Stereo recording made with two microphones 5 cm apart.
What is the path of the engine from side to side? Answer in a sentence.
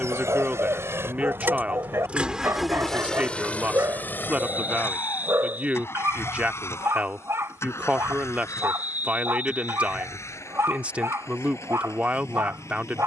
You can hear the engine move to the left.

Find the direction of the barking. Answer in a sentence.
In this clip you hear the barking on the right.